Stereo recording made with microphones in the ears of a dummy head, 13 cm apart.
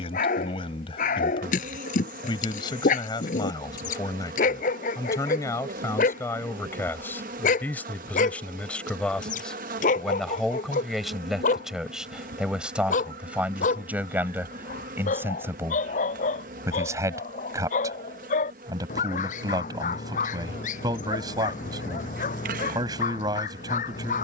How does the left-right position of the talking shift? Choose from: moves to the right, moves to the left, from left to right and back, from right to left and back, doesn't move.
moves to the right.